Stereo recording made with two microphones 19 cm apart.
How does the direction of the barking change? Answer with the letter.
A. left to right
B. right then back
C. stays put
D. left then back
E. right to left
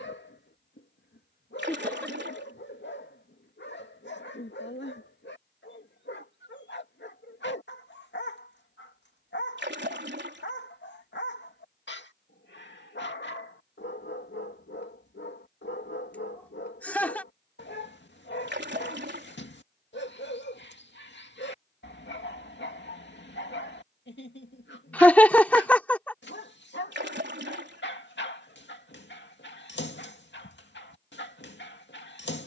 C.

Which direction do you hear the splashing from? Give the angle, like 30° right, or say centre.
70° right.